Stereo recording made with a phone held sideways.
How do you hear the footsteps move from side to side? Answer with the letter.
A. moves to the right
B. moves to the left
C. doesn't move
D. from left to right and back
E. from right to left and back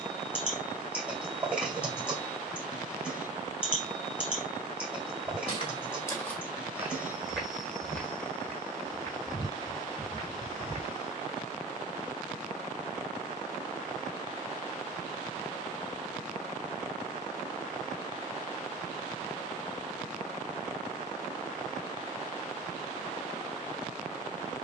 D.